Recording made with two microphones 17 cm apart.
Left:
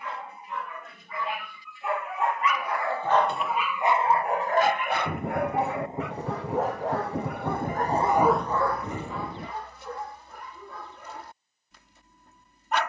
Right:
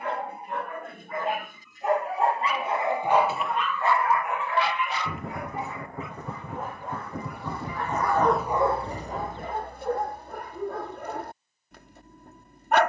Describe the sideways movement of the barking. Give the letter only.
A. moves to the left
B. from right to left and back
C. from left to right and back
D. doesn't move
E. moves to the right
B.